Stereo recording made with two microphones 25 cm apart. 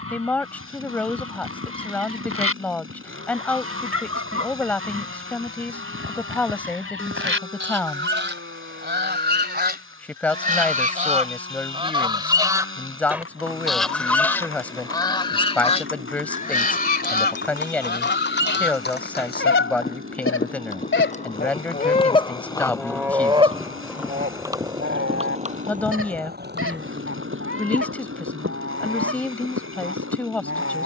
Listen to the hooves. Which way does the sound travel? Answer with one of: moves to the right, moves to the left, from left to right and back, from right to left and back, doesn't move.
moves to the right.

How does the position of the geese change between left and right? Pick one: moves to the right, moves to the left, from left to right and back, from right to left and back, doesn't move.
from right to left and back.